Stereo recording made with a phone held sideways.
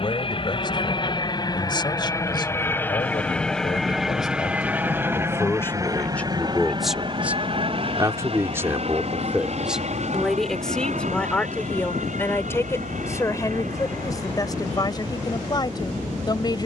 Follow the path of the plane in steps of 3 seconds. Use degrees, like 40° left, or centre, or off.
30° left, 10° right, 40° right, 50° right, 60° right, off.